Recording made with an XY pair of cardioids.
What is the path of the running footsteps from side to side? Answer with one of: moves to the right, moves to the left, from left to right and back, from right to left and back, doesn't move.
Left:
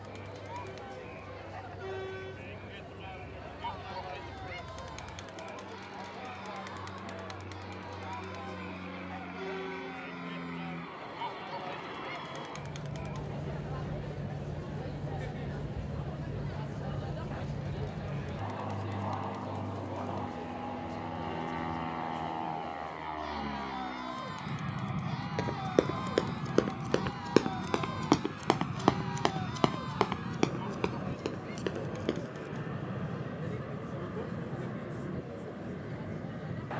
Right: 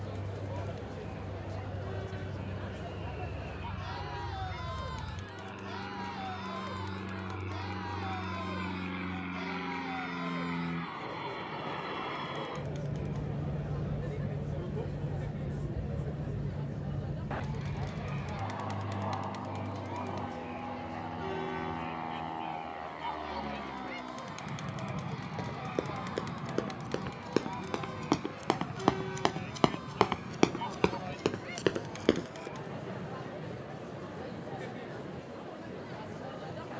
moves to the right.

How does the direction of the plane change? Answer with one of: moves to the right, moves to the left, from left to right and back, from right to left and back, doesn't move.
moves to the left.